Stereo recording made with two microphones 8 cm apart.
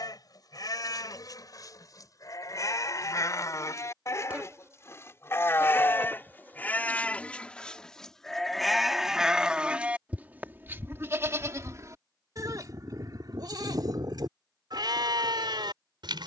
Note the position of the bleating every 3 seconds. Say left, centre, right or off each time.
left, left, centre, right, right, right.